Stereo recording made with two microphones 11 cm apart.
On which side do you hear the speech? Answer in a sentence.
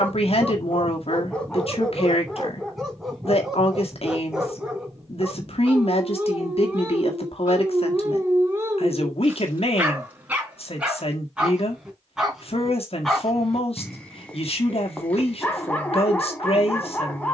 In this clip you hear the speech on the left.